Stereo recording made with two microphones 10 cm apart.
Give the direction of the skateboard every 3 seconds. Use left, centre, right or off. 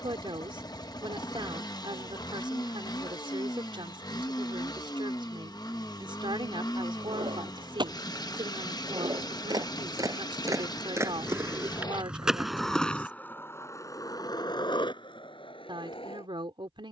off, off, right, right, left, left.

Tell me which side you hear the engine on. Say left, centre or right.
left.